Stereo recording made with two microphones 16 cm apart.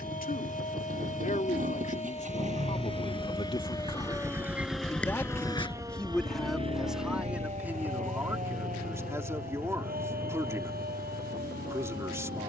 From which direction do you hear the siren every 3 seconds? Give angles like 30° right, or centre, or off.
50° left, 10° left, 40° right, 70° right.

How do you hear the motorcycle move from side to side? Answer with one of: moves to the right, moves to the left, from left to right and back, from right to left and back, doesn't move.
moves to the left.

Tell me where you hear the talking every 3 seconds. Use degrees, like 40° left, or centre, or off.
50° left, 20° left, 10° right, 20° right.